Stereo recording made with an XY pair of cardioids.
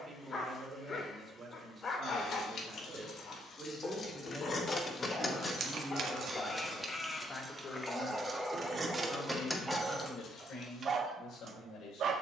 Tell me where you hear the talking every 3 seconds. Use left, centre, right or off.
right, centre, left, left.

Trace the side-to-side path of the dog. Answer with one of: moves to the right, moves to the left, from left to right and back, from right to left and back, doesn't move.
moves to the right.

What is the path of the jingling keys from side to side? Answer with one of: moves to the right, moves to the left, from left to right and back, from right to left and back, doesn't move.
from left to right and back.